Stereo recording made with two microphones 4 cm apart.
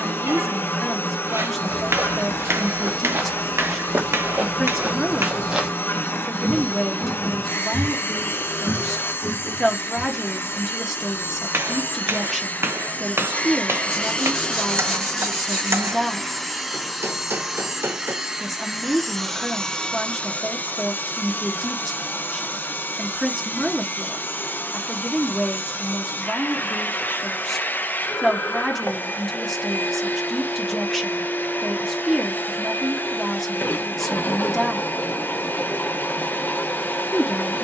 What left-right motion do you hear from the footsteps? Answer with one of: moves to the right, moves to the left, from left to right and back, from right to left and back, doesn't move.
moves to the left.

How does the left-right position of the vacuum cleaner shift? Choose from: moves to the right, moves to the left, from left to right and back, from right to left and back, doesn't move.
from left to right and back.